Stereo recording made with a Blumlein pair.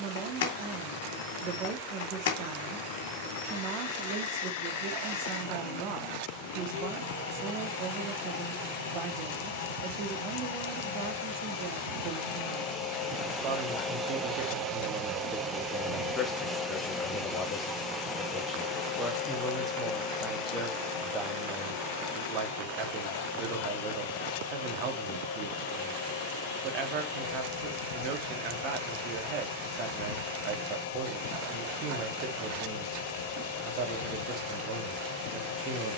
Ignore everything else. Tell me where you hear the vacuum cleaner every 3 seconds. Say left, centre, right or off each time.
left, left, left, left, centre, centre, left, left, left, left, left, left.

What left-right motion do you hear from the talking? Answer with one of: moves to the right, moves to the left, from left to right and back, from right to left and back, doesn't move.
from right to left and back.